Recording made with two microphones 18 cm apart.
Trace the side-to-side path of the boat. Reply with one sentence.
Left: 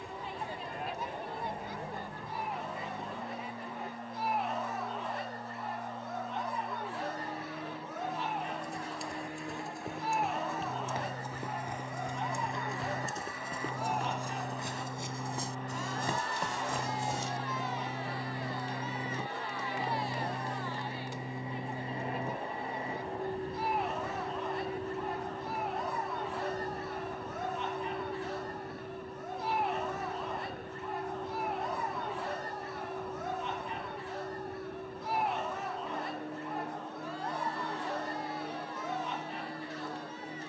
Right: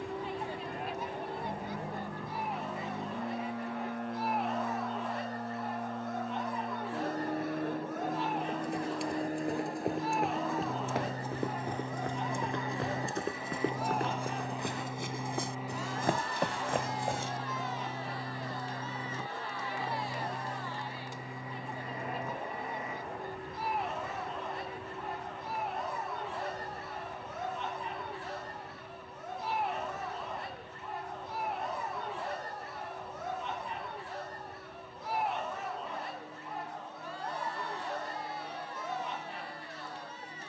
You can hear the boat move to the left.